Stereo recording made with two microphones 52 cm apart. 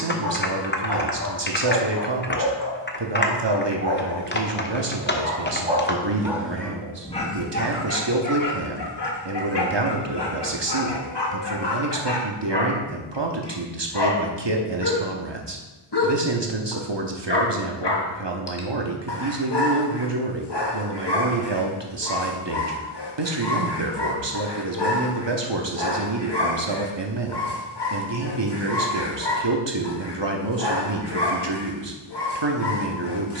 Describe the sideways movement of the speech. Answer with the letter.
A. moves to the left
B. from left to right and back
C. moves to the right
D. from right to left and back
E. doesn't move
E.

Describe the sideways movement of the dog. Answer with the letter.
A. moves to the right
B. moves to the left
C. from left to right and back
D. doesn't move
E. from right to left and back
B.